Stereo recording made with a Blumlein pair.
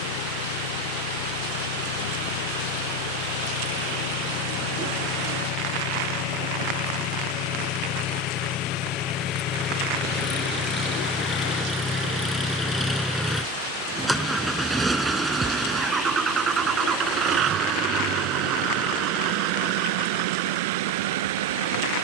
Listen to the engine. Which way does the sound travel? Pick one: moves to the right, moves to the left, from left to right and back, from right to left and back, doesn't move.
moves to the right.